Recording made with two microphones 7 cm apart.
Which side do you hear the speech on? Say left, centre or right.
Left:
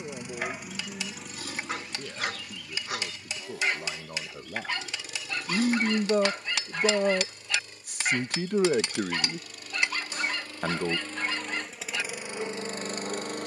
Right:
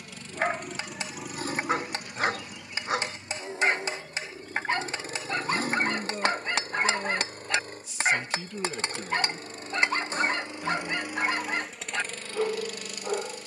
left.